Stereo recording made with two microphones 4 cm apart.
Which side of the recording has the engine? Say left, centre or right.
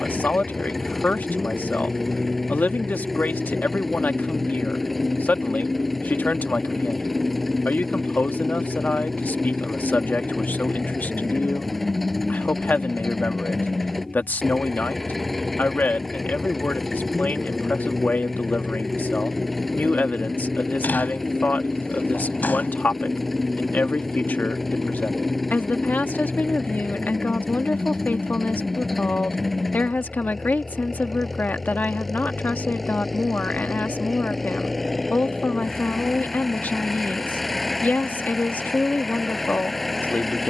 centre.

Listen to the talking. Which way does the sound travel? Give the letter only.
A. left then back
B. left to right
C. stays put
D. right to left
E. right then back
C.